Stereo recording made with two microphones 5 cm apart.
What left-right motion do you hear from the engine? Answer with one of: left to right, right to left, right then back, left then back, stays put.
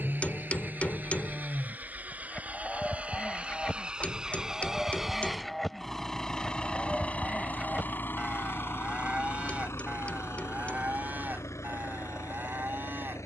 right to left.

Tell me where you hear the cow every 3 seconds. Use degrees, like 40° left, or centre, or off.
20° left, 10° left, 20° right, 40° right, 50° right.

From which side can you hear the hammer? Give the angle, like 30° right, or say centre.
30° left.